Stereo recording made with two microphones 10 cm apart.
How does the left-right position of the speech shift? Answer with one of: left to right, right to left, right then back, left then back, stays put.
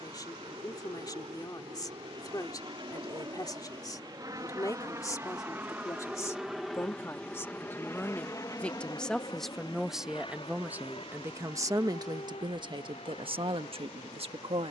left to right.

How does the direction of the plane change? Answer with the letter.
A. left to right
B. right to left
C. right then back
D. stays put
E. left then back
B.